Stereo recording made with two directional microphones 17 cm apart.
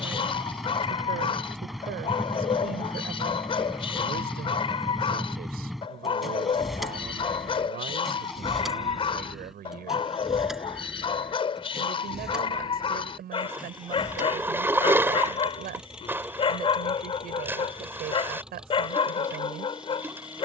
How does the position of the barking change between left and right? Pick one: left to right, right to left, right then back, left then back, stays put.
stays put.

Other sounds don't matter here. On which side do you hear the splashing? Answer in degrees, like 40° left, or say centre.
10° right.